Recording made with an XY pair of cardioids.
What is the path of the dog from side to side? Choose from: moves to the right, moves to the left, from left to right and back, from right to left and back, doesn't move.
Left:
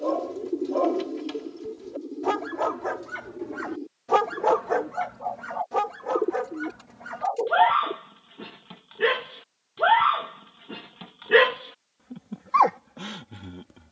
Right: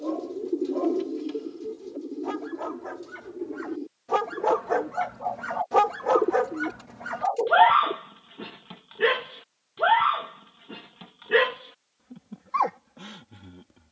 from left to right and back.